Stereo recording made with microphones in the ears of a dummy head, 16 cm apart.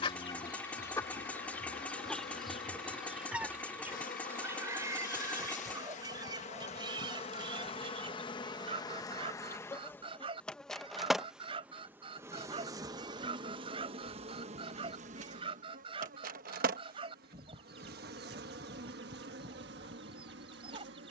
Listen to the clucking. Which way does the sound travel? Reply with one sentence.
In this clip you hear the clucking travel towards the right.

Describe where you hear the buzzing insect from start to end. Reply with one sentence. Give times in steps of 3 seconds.
You can hear the buzzing insect on the left from 0 s, in the centre from 9 s and on the right from 12 s.